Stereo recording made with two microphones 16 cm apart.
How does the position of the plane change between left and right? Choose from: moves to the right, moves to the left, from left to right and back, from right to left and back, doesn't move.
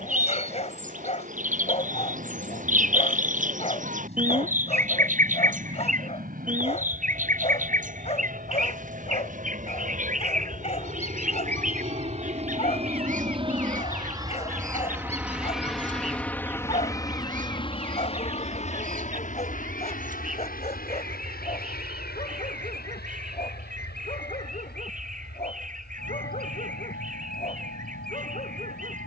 moves to the left.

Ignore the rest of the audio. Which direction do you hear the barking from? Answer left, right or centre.
left.